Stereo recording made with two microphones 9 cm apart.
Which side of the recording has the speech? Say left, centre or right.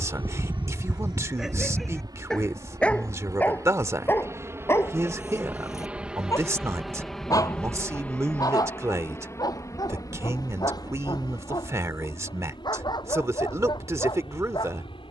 right.